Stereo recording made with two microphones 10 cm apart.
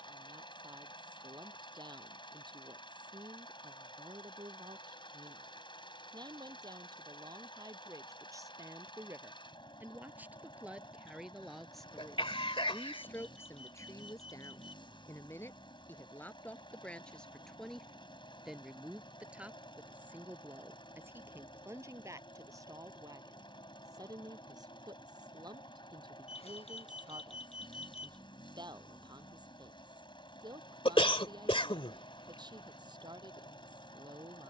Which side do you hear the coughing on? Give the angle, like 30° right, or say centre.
60° left.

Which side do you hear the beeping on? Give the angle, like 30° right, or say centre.
80° left.